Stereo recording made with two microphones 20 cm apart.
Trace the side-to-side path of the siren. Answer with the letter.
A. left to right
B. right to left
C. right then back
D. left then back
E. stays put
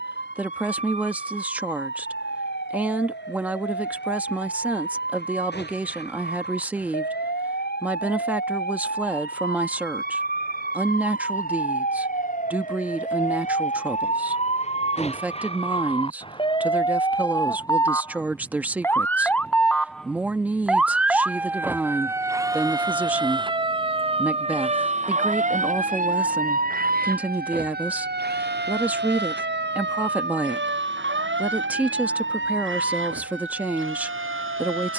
A.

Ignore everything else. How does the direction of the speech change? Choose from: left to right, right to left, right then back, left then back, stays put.
stays put.